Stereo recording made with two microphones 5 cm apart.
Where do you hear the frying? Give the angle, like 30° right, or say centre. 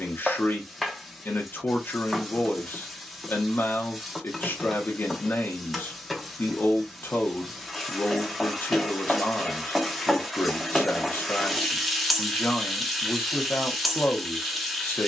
centre.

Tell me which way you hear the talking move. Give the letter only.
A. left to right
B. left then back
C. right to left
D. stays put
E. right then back
D.